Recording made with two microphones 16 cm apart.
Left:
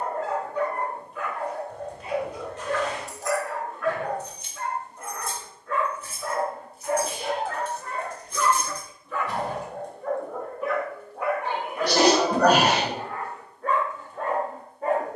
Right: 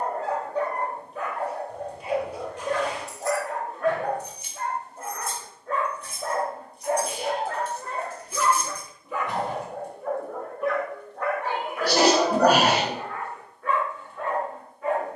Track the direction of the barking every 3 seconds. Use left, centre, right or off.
right, right, right, centre, left.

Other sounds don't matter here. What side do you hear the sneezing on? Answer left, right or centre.
centre.